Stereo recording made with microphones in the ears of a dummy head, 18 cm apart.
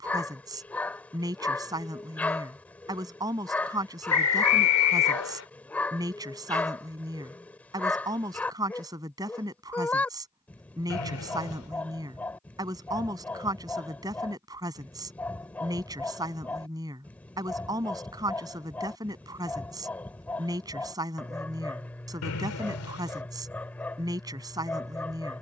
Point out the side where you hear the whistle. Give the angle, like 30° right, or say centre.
80° left.